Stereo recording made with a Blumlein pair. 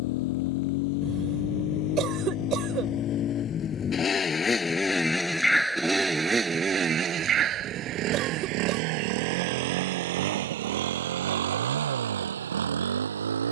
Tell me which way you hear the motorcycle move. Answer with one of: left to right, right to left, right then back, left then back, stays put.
left to right.